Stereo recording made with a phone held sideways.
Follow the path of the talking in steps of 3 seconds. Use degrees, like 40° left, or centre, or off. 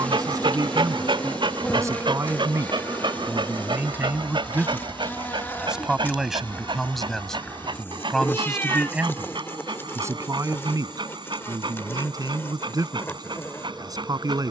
20° right, 10° right, centre, 20° right, 20° right.